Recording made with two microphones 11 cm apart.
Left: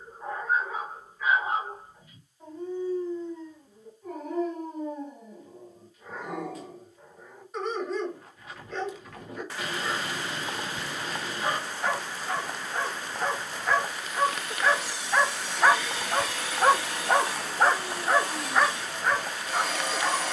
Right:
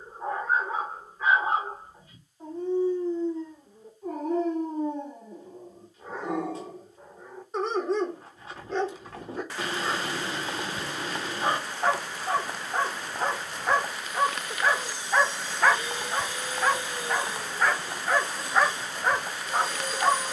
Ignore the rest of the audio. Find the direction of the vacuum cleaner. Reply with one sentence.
In this clip you hear the vacuum cleaner on the left.